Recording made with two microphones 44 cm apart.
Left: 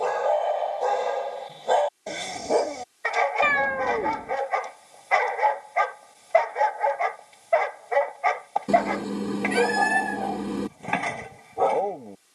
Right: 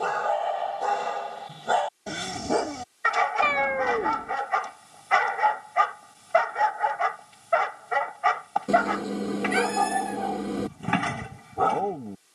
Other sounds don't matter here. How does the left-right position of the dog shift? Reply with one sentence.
You can hear the dog stay in one place.